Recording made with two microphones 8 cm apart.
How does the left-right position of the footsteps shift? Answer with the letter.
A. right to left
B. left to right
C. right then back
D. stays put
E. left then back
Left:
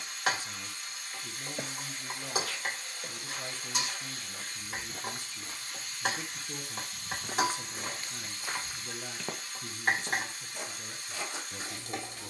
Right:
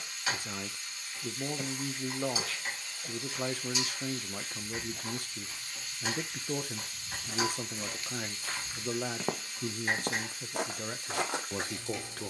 B.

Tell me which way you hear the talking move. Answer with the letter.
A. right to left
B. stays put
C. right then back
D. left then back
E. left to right
B.